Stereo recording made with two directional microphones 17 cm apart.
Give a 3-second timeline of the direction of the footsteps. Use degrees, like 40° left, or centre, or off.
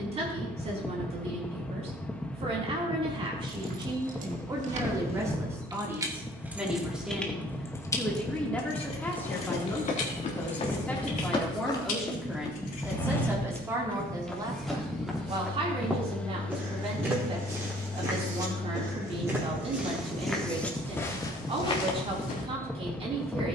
off, off, off, 40° left, 10° left, 10° right, 10° right, 30° left.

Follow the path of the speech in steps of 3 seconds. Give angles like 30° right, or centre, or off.
40° right, 20° right, centre, 10° left, 10° right, 40° right, 40° right, 40° right.